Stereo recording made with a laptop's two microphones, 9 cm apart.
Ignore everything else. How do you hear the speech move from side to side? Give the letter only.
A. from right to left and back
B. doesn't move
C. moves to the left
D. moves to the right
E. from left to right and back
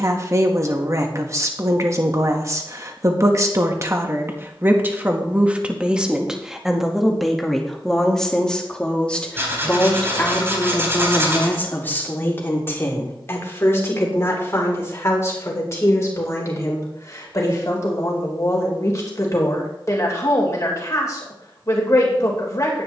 C.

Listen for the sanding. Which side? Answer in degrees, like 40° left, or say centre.
30° right.